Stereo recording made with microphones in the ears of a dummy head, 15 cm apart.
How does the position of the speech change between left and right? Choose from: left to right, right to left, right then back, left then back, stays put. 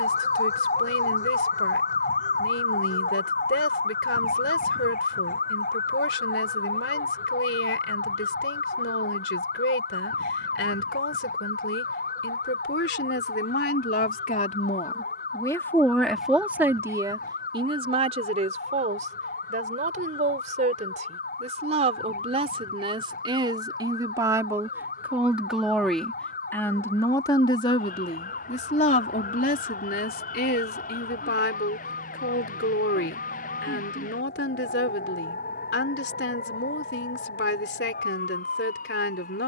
right then back.